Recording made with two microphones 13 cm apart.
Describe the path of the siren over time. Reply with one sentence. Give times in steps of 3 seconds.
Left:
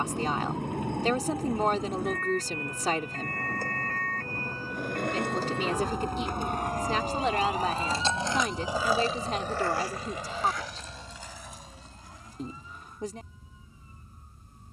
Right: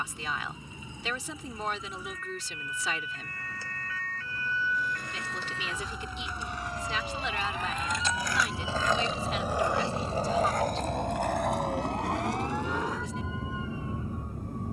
In this clip you hear the siren on the left from 0 s, in the centre from 6 s and on the right from 9 s.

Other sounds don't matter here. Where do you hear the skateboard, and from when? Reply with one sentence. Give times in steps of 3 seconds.
In this clip you hear the skateboard not at all from 0 s, on the left from 3 s and on the right from 9 s.